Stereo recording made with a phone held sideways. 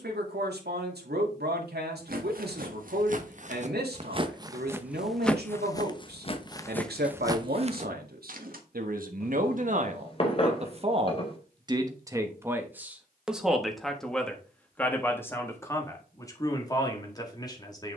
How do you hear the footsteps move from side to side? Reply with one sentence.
In this clip you hear the footsteps move from right to left and back again.